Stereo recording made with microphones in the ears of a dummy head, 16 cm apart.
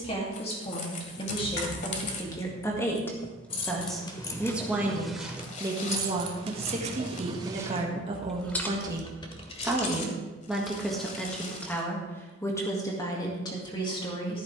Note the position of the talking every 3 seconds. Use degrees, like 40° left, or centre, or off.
30° left, 10° right, 30° right, centre, 20° left.